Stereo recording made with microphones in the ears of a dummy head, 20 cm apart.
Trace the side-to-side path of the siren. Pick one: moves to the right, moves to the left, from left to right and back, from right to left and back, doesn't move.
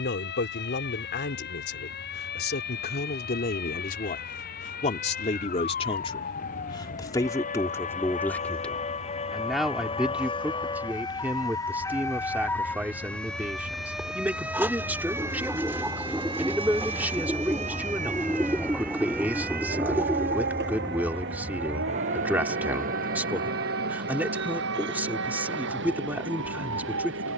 moves to the right.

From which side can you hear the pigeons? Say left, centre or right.
centre.